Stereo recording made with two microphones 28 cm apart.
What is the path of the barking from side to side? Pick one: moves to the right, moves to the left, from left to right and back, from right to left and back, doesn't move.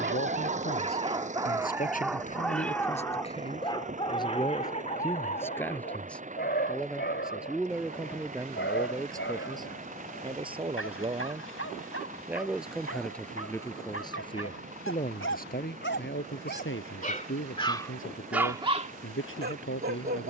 from right to left and back.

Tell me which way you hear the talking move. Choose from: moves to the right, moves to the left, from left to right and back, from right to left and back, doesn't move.
from left to right and back.